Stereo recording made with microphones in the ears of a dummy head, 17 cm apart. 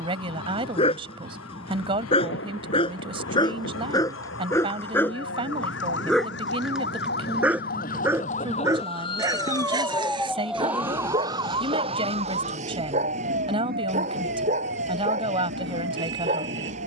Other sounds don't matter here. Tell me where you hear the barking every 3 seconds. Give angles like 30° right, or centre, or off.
30° left, 10° left, 10° right, 30° right, 30° right, 40° right.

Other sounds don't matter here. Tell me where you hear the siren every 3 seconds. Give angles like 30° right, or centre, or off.
80° left, 70° left, 50° left, centre, 40° right, 60° right.